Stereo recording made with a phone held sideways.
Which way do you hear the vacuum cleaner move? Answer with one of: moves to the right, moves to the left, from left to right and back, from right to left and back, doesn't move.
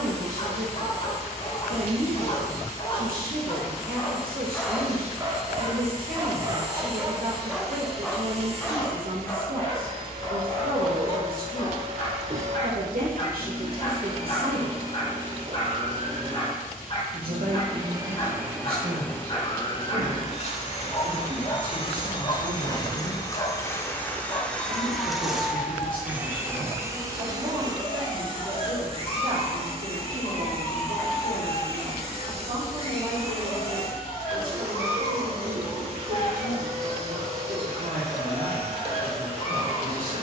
from right to left and back.